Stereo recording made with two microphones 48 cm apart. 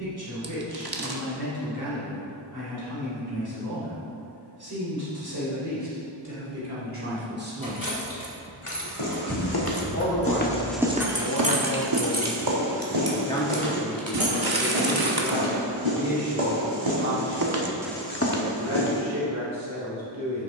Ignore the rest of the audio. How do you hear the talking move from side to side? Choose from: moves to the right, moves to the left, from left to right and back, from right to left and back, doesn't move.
from right to left and back.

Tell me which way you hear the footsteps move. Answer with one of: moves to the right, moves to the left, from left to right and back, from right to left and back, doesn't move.
from left to right and back.